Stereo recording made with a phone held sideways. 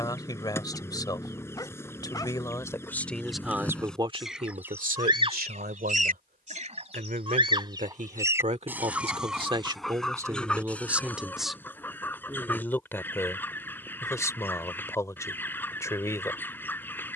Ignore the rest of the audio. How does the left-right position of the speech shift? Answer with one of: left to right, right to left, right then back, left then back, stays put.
right then back.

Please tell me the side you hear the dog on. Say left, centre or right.
left.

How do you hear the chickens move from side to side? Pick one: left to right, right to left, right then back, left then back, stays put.
right then back.